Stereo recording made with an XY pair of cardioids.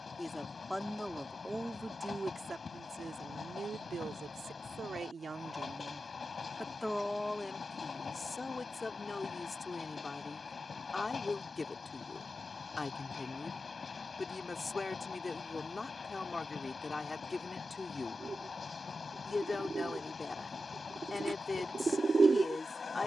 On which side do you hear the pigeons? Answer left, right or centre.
right.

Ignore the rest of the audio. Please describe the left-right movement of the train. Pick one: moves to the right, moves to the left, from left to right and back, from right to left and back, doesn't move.
doesn't move.